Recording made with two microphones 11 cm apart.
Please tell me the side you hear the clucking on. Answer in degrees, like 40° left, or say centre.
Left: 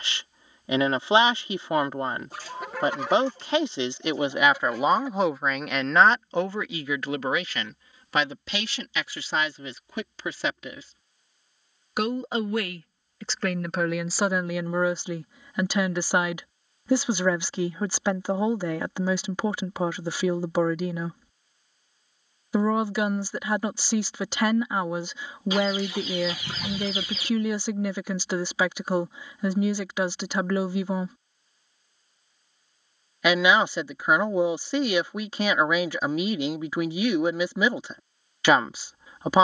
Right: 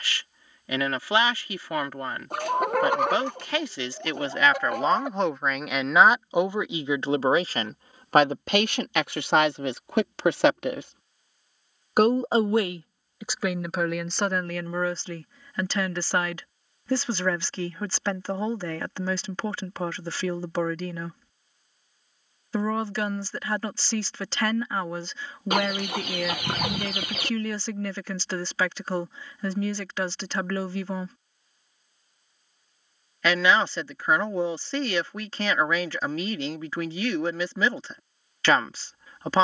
60° right.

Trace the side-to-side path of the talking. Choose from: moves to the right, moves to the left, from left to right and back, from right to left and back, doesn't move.
from left to right and back.